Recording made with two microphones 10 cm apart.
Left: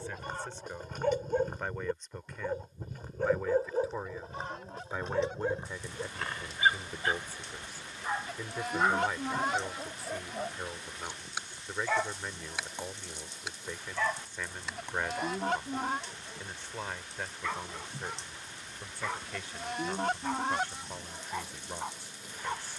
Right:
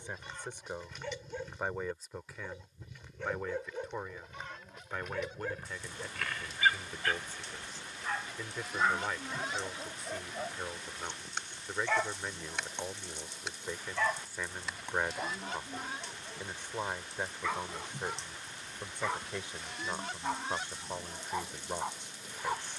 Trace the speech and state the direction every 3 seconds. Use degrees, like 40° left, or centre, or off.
10° right, 10° left, 10° left, centre, 10° right, 10° right, 20° right, 20° right.